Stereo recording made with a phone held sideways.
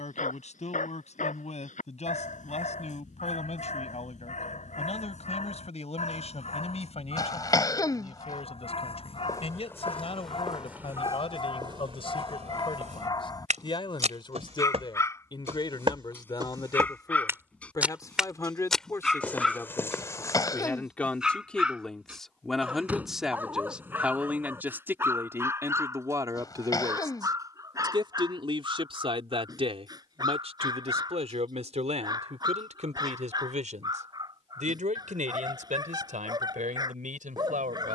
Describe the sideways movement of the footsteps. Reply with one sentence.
In this clip you hear the footsteps go right and come back.